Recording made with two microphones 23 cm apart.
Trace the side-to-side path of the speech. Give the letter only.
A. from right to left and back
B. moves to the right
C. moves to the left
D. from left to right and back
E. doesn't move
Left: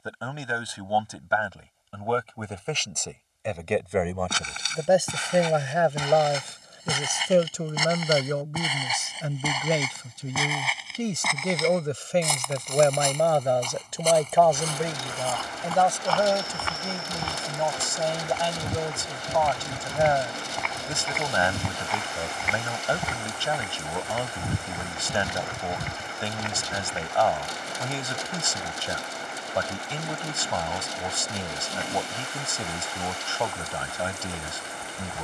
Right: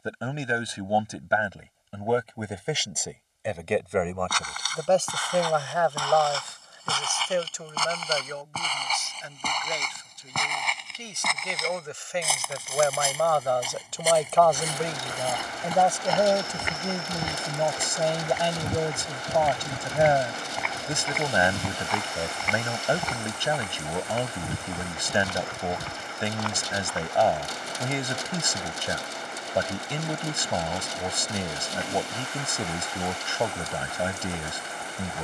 A.